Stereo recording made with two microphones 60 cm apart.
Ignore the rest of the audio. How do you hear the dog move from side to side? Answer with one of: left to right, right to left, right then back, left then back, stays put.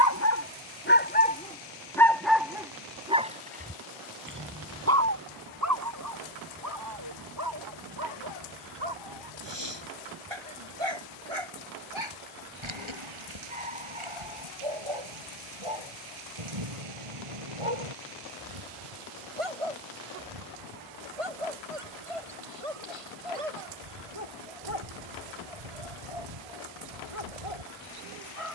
left to right.